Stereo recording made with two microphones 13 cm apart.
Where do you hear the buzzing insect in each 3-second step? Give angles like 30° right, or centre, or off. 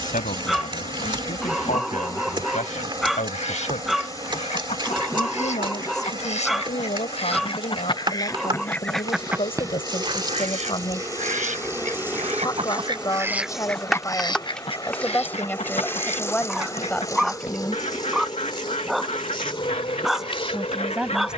40° right, 40° right, 40° right, 30° right, centre, 20° left, 40° left.